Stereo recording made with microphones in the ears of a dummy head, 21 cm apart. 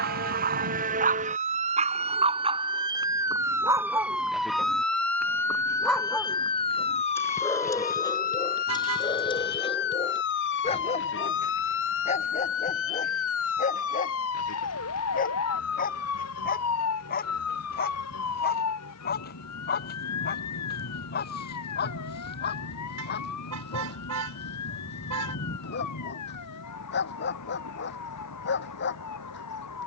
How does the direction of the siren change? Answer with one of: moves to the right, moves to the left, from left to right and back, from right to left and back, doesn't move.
moves to the left.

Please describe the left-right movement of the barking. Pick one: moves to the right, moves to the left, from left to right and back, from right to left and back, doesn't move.
moves to the left.